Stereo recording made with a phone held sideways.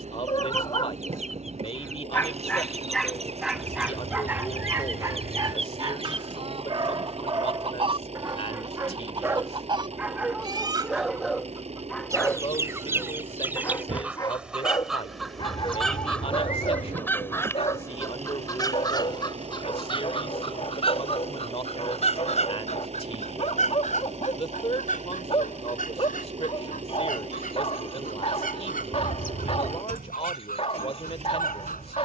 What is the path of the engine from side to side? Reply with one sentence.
You can hear the engine stay in one place.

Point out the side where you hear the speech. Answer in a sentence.
In this clip you hear the speech on the left.